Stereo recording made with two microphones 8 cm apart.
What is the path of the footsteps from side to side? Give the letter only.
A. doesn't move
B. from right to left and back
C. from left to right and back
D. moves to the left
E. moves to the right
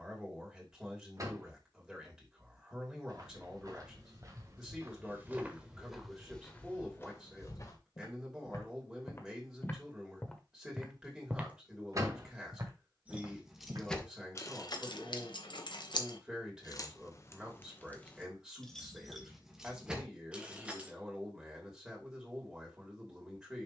B.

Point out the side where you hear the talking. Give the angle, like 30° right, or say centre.
10° right.